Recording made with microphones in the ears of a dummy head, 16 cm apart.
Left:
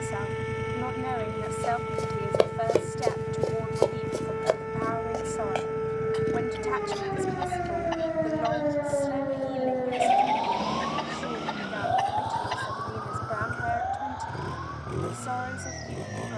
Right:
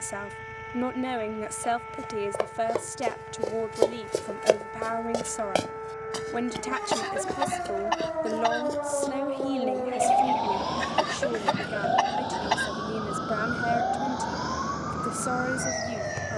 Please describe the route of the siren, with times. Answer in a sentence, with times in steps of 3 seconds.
In this clip you hear the siren on the left from 0 s, in the centre from 9 s and on the right from 12 s.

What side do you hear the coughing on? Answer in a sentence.
You can hear the coughing on the right.